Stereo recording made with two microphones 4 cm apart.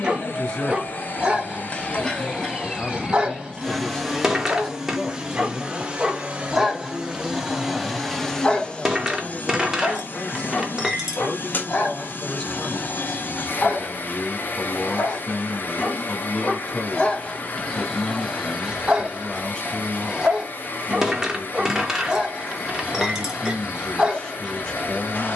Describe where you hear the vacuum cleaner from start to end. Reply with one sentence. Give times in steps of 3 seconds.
You can hear the vacuum cleaner on the left from 0 s, in the centre from 3 s and on the left from 9 s.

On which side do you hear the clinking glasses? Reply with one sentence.
In this clip you hear the clinking glasses in the centre.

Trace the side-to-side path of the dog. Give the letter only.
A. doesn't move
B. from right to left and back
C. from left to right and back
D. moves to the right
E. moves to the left
B.